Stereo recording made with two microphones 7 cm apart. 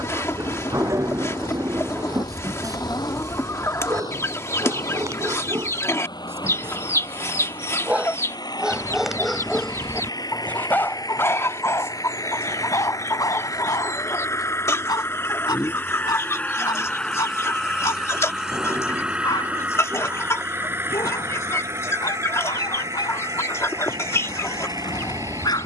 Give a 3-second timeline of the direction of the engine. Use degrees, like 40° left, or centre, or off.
80° left, 80° left, 70° left, 60° left, 50° left, 20° left, 20° right, 40° right, 50° right.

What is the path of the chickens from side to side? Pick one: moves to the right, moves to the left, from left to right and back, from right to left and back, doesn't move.
doesn't move.